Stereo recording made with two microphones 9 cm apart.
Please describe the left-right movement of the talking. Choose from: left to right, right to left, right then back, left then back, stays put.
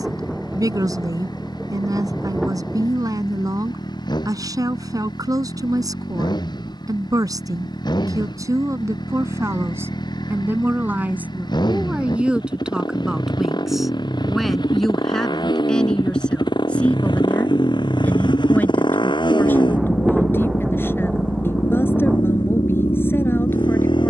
right to left.